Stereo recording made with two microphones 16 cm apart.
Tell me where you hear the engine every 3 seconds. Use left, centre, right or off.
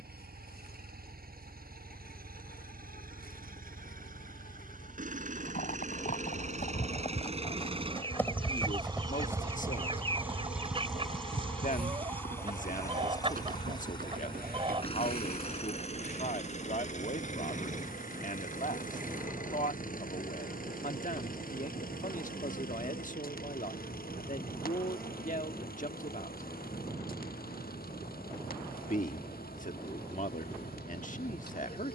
right, right, right, centre, left, left, left, left, left, left, left.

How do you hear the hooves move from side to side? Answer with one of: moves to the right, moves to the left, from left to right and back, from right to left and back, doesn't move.
moves to the right.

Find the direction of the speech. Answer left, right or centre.
left.